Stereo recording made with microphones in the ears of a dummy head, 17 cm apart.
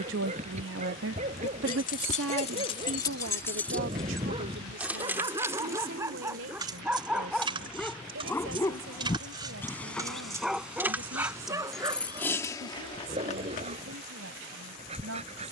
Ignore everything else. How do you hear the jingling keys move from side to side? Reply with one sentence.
In this clip you hear the jingling keys go right and come back.